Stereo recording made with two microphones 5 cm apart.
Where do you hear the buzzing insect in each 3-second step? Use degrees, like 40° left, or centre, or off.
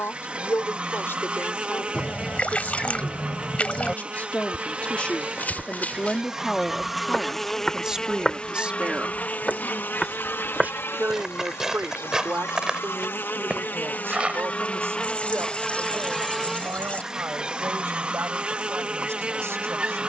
20° right, 20° right, 10° left, 50° left, 50° left, centre, 20° right.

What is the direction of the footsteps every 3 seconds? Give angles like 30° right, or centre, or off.
off, 40° left, 20° left, 10° right, 20° right, off, off.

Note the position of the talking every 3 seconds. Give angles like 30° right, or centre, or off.
50° left, 30° left, 10° right, 50° right, 60° right, 70° right, 70° right.